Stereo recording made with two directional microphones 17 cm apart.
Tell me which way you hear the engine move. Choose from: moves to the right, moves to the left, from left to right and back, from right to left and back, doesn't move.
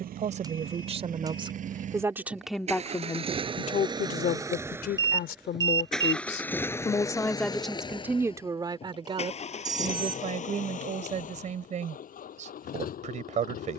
moves to the left.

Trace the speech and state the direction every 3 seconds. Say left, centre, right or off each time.
right, left, centre, right, right.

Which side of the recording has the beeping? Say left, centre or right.
right.